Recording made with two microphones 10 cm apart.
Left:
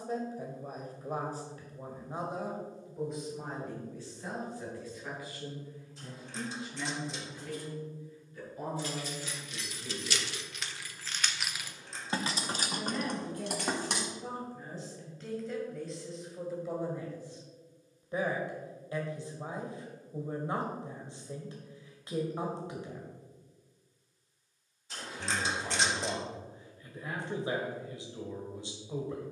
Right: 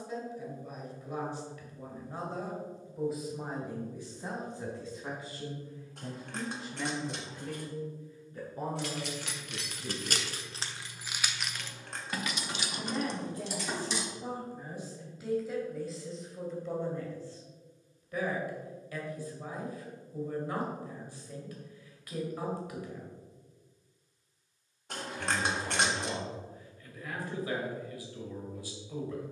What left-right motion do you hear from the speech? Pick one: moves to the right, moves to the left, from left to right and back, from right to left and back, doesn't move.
from left to right and back.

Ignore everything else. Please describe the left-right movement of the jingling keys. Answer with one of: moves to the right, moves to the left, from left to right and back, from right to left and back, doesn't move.
moves to the left.